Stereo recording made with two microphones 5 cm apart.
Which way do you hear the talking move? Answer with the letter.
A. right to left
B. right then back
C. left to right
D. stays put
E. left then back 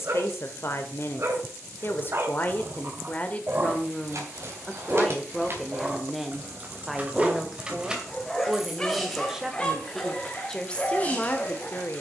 B.